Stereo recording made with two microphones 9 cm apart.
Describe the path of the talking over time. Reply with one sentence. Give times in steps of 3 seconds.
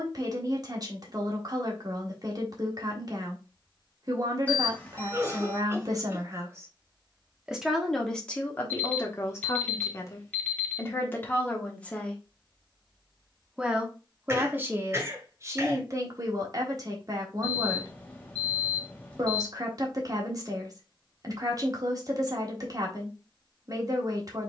You can hear the talking on the right from 0 s, in the centre from 6 s, on the left from 9 s, in the centre from 12 s and on the right from 15 s.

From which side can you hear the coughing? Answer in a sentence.
You can hear the coughing on the right.